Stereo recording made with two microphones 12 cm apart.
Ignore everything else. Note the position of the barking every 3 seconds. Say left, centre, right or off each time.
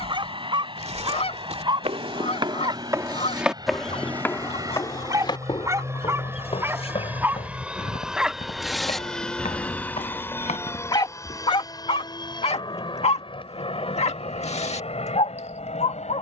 right, right, centre, left, left, left.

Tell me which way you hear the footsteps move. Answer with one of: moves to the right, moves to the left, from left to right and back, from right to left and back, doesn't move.
moves to the left.